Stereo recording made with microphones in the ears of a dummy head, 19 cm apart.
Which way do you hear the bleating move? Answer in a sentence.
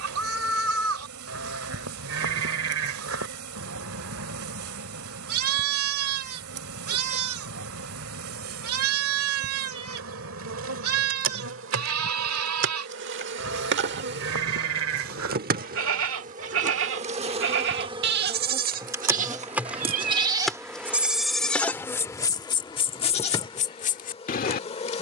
In this clip you hear the bleating move from right to left.